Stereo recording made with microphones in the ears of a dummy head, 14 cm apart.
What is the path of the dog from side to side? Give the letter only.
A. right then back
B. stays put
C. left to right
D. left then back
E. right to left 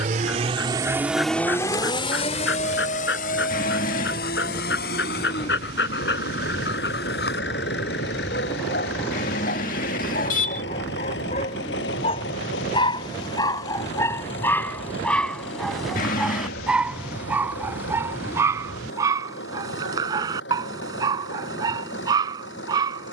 C.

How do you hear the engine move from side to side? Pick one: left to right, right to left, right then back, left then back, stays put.
right to left.